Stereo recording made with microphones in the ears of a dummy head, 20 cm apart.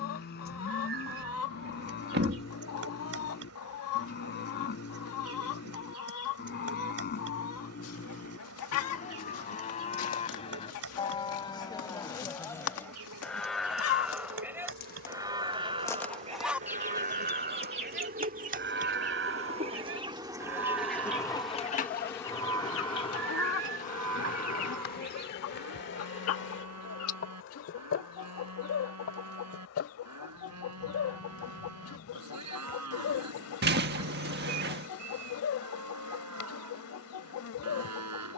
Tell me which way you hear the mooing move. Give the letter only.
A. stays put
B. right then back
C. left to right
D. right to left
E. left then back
C.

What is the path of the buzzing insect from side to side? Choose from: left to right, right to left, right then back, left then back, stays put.
right to left.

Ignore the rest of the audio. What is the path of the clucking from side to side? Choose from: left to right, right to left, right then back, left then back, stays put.
right then back.